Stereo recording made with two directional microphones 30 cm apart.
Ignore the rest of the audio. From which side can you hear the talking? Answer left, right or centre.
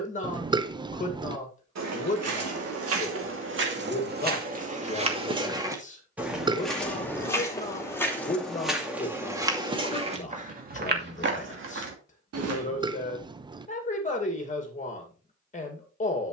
left.